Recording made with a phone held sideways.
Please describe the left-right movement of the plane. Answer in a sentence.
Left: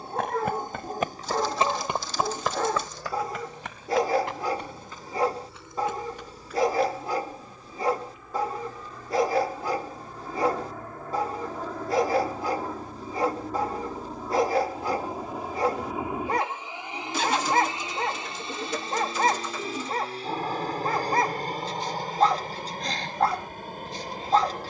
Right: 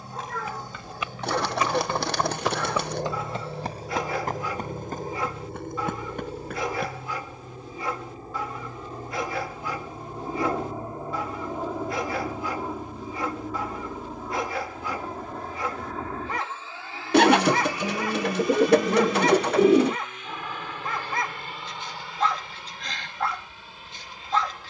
You can hear the plane go from the right side to the left.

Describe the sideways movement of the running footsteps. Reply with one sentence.
You can hear the running footsteps travel towards the right.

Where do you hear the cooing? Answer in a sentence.
You can hear the cooing on the right.